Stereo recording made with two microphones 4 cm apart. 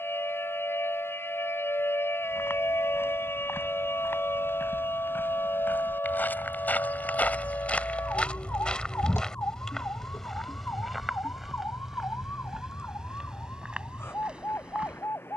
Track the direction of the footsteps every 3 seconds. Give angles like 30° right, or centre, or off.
70° left, 60° left, 40° left, centre, 20° right.